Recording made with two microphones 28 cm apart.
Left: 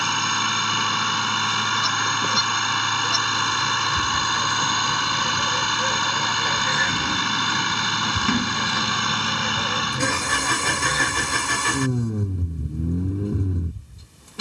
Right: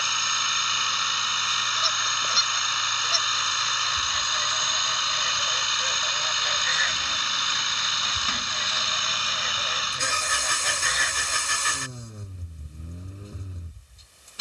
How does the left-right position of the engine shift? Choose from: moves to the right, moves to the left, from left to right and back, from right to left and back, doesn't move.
doesn't move.